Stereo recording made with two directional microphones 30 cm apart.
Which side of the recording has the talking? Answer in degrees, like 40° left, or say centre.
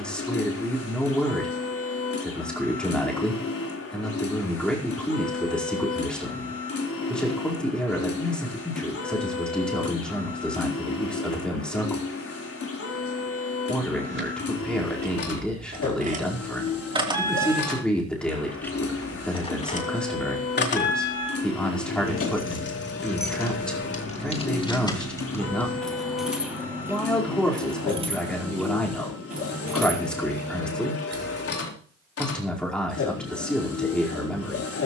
centre.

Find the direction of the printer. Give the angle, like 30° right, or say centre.
50° left.